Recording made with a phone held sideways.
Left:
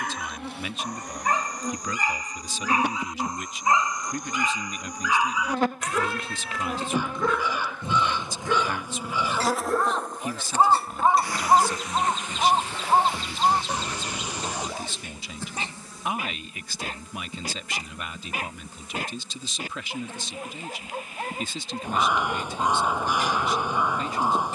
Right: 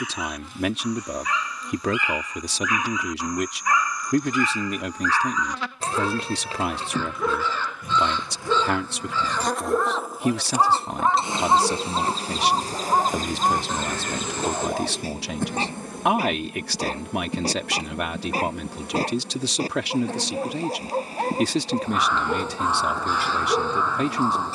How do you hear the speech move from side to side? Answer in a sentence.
You can hear the speech stay in one place.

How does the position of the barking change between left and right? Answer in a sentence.
You can hear the barking travel towards the right.